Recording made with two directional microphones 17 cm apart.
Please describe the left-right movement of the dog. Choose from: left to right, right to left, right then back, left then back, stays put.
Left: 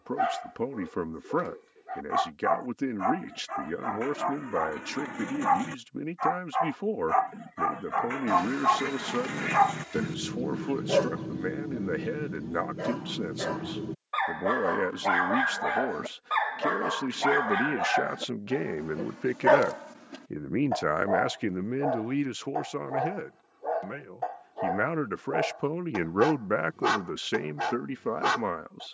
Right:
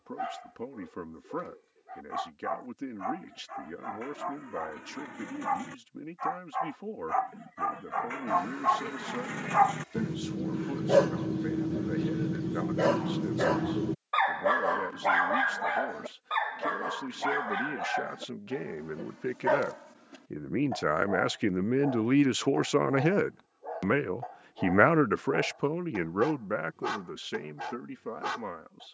right then back.